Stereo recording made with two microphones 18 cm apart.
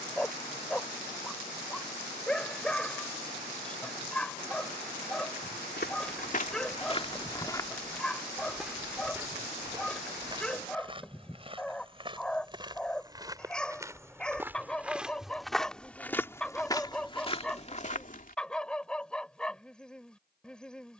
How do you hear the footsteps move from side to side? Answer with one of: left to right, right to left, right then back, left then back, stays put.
right then back.